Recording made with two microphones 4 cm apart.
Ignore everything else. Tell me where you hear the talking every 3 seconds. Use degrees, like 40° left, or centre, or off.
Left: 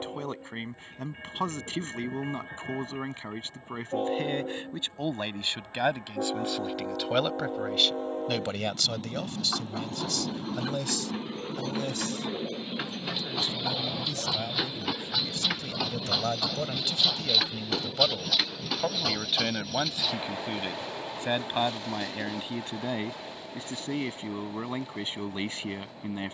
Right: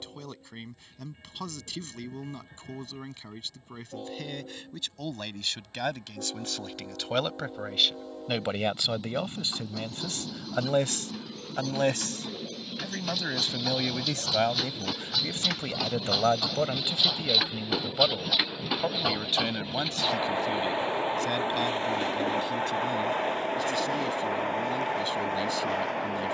30° left, 30° left, centre, 40° right, 50° right, 20° right, 10° left, 30° left, 30° left.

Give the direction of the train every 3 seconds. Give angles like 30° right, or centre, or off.
50° left, 40° left, 40° left, 30° left, 20° left, centre, 20° right, 40° right, 60° right.